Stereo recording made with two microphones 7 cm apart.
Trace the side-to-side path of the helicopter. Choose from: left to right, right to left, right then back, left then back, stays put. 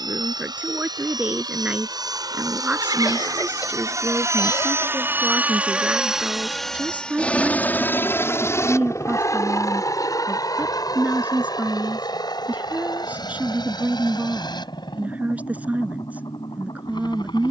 right to left.